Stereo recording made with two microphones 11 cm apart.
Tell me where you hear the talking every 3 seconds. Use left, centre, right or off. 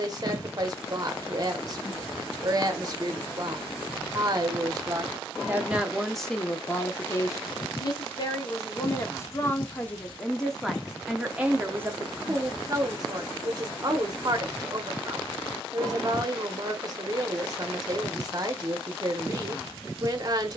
right, right, left, centre, right, right, right.